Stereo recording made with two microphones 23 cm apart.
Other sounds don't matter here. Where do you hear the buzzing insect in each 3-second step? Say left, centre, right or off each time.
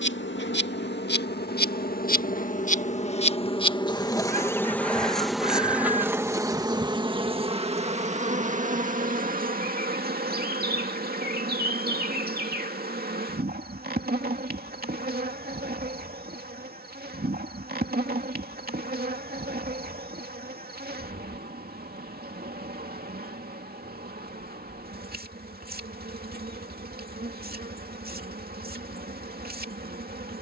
left, centre, right, right, right, right, right, right, right, right.